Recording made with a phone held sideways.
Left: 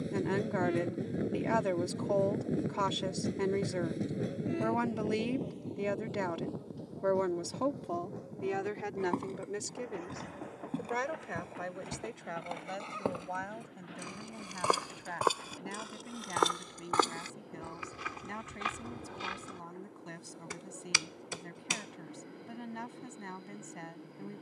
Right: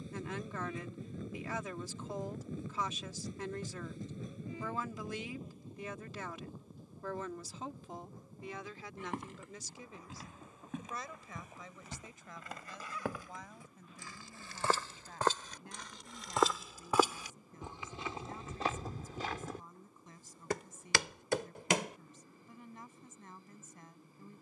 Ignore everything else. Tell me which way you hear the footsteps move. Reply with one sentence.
In this clip you hear the footsteps travel towards the right.